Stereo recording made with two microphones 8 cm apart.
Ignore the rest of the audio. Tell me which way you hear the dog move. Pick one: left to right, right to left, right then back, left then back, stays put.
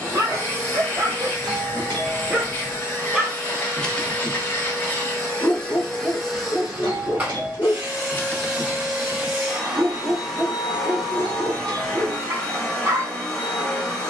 left then back.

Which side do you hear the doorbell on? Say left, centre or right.
right.